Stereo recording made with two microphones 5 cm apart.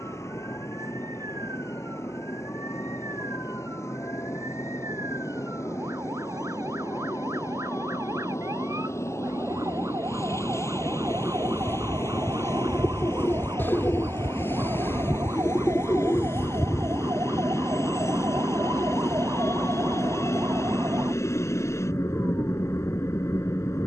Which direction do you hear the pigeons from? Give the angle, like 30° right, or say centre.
40° left.